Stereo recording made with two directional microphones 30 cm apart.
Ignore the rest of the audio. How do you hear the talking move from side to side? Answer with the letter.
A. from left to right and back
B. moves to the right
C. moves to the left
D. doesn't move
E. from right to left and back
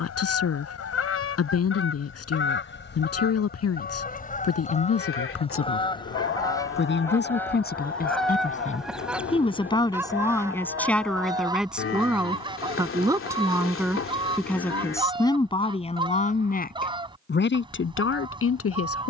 A.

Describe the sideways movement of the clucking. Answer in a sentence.
In this clip you hear the clucking move to the right.